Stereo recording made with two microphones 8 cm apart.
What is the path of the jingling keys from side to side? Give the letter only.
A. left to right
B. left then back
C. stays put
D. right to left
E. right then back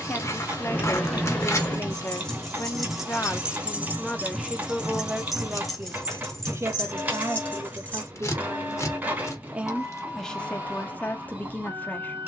E.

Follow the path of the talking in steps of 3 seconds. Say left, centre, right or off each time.
left, centre, right, centre.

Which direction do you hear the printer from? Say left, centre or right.
right.